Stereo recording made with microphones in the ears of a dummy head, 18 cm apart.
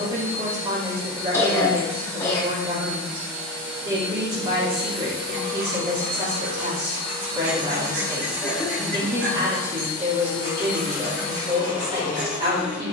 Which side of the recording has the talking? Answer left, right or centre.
right.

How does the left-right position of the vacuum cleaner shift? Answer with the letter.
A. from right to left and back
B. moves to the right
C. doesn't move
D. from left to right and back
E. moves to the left
E.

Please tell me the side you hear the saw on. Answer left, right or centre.
right.